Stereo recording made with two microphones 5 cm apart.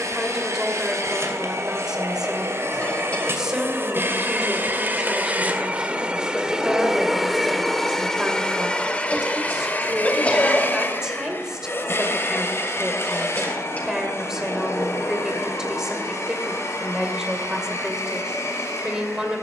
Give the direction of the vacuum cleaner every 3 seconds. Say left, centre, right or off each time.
right, right, centre, left, left, left, left.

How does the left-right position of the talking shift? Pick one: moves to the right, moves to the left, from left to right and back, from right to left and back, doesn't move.
doesn't move.